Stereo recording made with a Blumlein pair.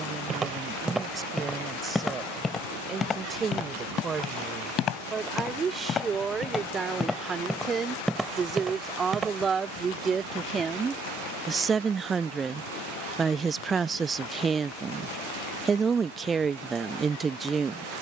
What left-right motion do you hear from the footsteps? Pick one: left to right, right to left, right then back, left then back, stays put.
left then back.